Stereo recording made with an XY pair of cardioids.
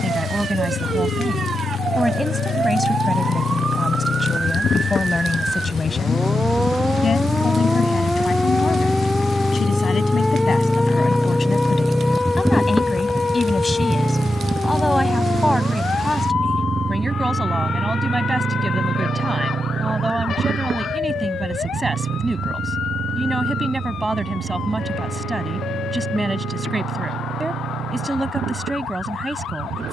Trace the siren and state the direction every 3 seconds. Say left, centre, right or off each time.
right, right, centre, centre, left, left, left, left, left, left.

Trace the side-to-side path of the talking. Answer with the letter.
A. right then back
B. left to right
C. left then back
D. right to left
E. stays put
C.